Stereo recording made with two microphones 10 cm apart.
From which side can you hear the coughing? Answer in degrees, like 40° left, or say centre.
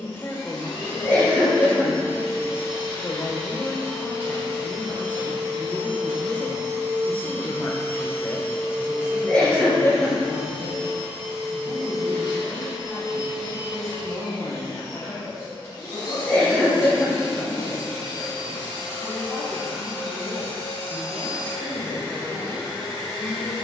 20° left.